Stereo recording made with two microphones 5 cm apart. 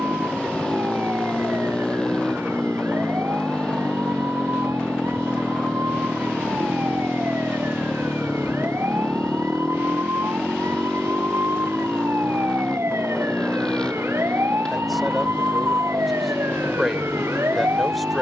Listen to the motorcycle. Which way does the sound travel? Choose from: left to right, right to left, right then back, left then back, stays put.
stays put.